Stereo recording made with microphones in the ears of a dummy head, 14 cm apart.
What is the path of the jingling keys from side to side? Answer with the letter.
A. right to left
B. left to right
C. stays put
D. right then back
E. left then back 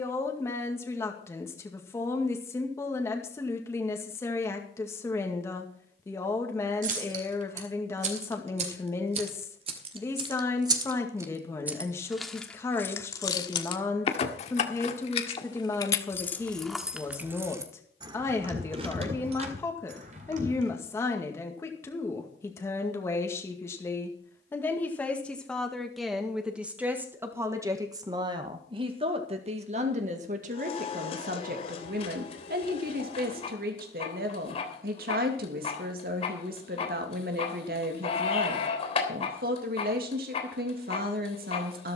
E.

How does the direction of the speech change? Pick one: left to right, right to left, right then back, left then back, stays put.
left to right.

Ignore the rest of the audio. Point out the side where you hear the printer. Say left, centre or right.
left.